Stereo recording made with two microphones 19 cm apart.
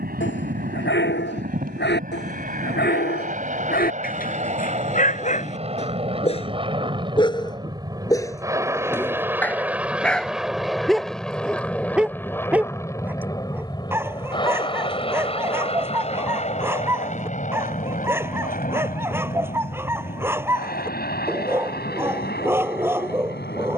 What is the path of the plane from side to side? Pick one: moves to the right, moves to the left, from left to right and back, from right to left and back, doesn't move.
moves to the left.